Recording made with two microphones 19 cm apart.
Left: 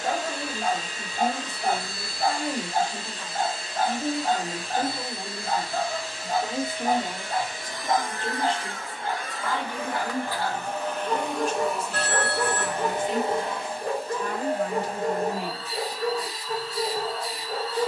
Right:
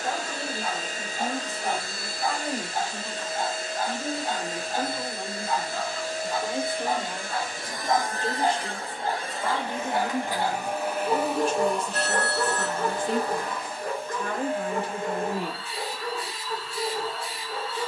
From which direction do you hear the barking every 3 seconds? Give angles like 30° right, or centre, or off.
50° left, 50° left, 10° left, 20° right, 20° left, 40° left.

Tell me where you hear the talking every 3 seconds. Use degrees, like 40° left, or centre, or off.
20° left, 10° left, 10° right, 30° right, 50° right, 60° right.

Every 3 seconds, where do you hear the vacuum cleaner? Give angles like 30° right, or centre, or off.
50° right, 50° right, 40° right, 10° right, 30° left, 40° left.